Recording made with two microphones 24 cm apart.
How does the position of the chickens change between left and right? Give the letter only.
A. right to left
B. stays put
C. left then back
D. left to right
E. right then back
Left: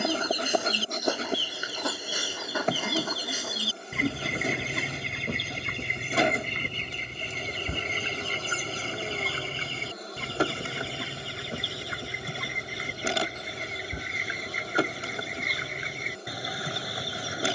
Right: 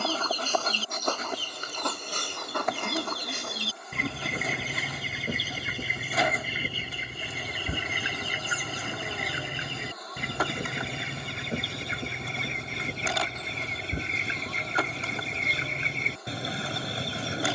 D.